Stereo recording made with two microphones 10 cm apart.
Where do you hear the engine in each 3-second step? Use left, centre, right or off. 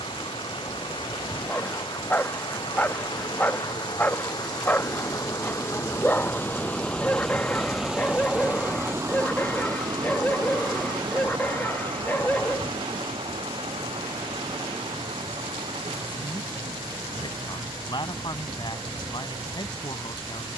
left, left, centre, right, right, right, right.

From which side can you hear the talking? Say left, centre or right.
left.